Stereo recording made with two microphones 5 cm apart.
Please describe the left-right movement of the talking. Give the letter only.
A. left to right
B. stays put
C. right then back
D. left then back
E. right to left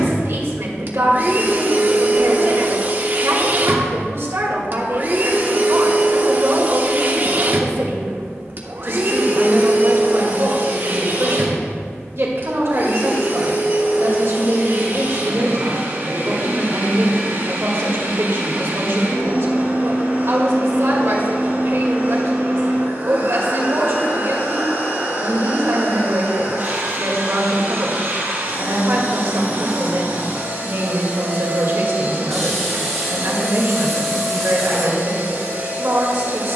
B.